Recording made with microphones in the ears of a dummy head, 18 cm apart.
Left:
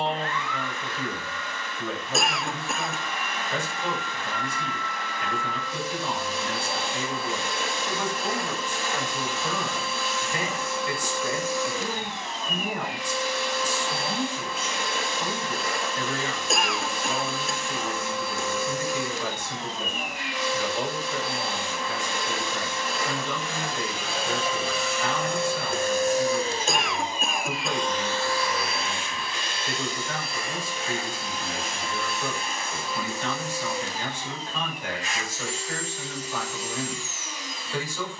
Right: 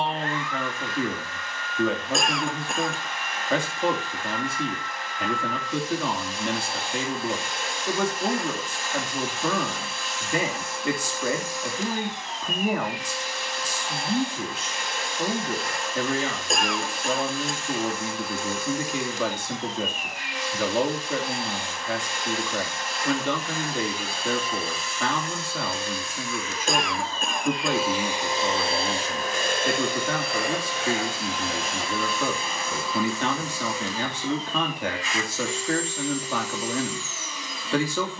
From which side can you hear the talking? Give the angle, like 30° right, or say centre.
50° right.